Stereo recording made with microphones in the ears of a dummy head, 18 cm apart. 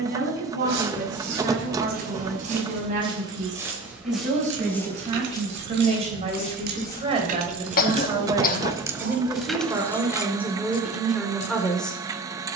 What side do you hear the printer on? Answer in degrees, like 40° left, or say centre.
20° right.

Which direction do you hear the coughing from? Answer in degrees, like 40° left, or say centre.
40° left.